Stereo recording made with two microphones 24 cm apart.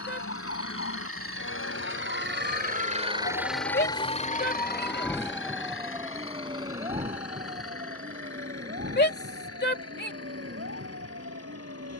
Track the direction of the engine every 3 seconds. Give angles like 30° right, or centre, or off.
60° right, 30° left, 70° left, 80° left.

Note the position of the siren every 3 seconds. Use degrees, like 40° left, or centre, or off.
60° left, 20° left, 30° right, 50° right.